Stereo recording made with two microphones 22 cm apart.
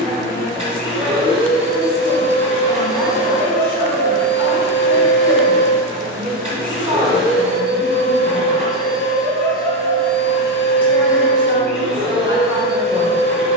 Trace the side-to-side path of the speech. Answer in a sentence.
You can hear the speech stay put.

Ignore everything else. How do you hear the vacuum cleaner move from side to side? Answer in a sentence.
In this clip you hear the vacuum cleaner stay put.